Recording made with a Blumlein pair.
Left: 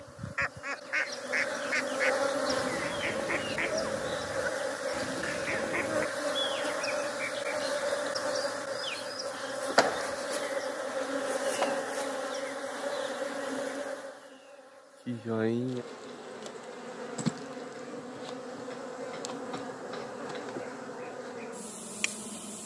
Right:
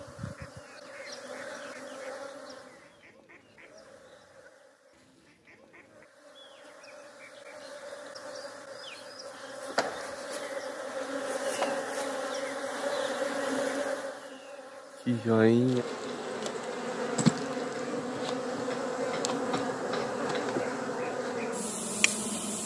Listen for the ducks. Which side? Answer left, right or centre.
left.